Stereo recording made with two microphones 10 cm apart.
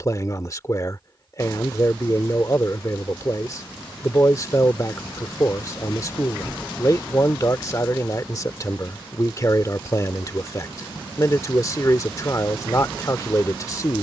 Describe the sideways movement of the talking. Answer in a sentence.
You can hear the talking stay put.